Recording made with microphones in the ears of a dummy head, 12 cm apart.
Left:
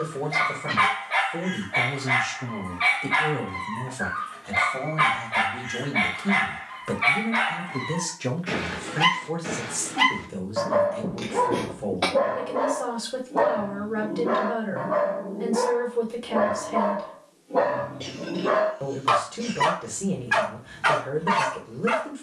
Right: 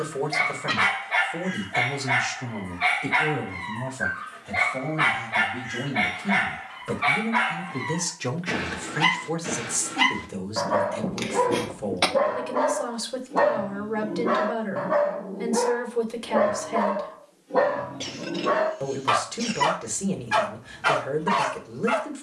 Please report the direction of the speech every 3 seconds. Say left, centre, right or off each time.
right, left, centre, right, right, right, right, right.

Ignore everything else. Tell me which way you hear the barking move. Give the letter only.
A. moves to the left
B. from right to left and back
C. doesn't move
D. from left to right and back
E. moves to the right
D.